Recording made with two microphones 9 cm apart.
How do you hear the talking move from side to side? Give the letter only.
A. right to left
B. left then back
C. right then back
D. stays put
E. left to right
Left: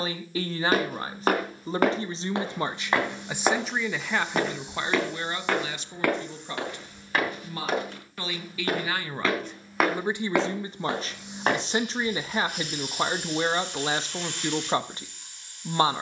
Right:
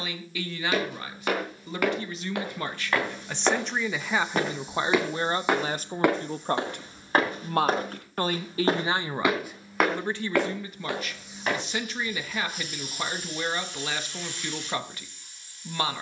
C.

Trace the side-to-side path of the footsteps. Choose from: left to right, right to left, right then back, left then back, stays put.
right then back.